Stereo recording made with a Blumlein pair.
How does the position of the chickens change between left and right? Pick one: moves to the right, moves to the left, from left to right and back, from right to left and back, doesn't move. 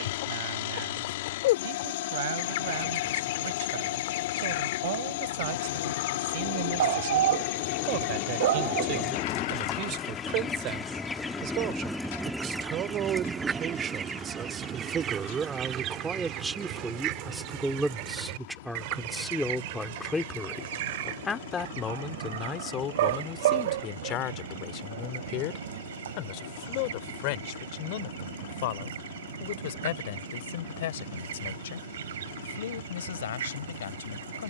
moves to the right.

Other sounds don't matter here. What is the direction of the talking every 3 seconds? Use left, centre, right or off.
right, right, right, right, right, centre, centre, left, left, left, left, left.